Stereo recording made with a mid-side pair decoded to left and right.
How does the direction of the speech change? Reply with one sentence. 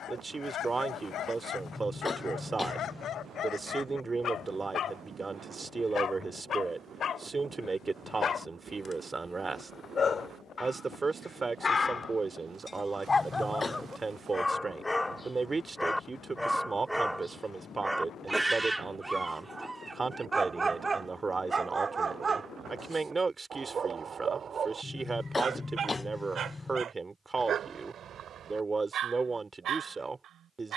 You can hear the speech stay put.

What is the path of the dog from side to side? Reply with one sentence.
You can hear the dog travel towards the right.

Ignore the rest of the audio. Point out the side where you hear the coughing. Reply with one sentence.
In this clip you hear the coughing on the left.